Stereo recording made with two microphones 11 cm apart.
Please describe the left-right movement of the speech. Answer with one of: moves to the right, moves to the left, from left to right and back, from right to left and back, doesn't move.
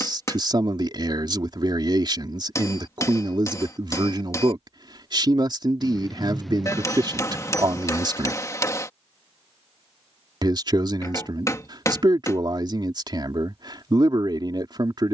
doesn't move.